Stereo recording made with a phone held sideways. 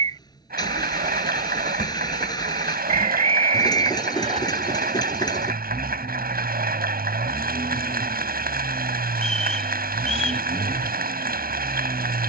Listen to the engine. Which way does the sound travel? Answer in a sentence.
You can hear the engine stay in one place.